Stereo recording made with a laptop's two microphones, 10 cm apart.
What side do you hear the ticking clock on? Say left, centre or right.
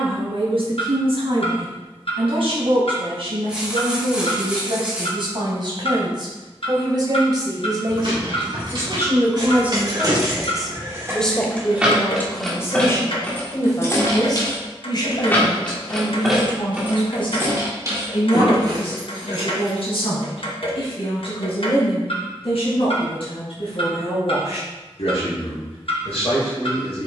left.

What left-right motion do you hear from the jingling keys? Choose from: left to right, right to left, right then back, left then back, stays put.
left then back.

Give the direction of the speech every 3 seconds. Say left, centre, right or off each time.
right, right, right, centre, left, left, left, left, left.